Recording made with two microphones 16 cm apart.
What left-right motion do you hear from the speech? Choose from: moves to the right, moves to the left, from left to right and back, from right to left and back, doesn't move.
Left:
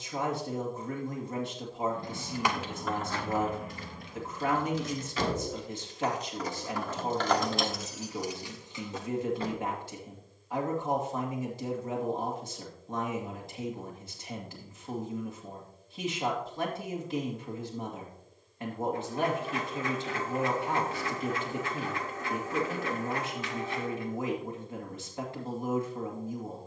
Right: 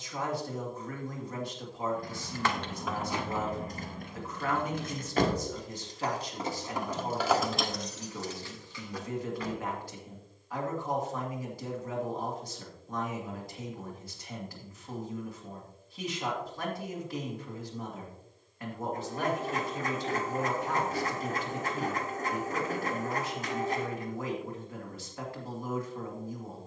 doesn't move.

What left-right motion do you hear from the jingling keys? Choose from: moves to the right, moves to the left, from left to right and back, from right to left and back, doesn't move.
from left to right and back.